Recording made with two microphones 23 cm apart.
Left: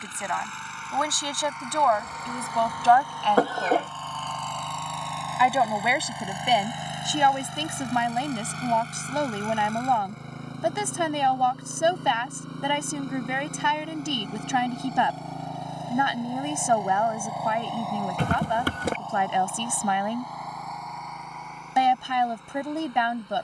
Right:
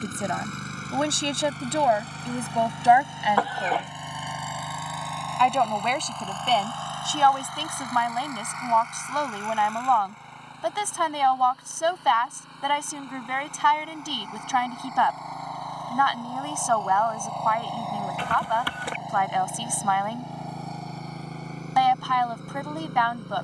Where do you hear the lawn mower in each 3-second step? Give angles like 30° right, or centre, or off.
40° right, 10° right, 20° left, 50° left, 40° left, 20° left, 20° right, 40° right.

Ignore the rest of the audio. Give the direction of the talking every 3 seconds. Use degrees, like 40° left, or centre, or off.
20° right, centre, 20° left, 20° left, 20° left, 20° left, 20° left, 20° left.